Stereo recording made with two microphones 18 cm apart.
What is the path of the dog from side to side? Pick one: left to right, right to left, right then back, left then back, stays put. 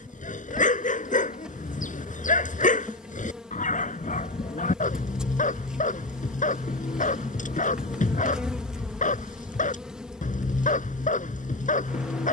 stays put.